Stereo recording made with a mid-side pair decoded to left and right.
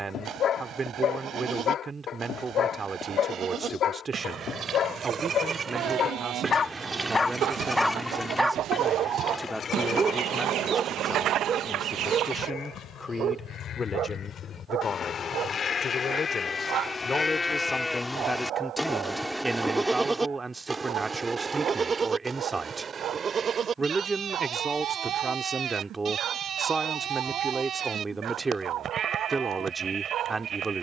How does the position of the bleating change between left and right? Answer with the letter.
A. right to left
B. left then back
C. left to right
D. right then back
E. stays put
B.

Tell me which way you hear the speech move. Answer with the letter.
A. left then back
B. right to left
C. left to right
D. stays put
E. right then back
A.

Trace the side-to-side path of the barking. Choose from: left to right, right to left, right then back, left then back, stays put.
left to right.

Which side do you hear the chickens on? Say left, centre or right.
right.